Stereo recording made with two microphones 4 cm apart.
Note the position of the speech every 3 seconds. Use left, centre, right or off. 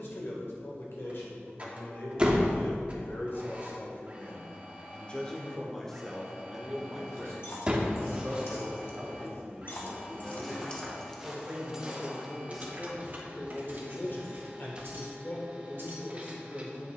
left, left, centre, right, left, left.